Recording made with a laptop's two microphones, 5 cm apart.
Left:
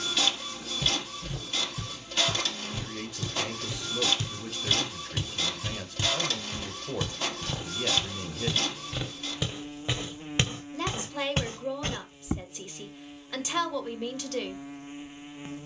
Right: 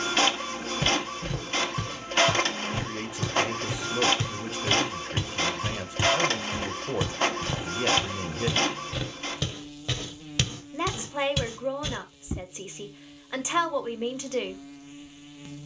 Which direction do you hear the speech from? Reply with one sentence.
You can hear the speech on the right.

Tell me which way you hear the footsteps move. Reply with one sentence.
In this clip you hear the footsteps move to the left.